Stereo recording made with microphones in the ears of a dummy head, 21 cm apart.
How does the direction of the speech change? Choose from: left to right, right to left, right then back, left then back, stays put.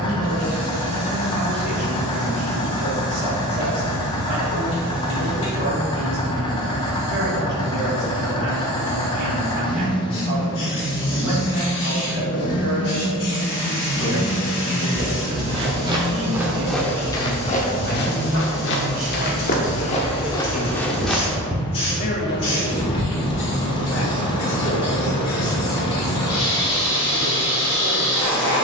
right to left.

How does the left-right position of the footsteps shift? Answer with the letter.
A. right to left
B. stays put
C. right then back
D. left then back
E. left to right
D.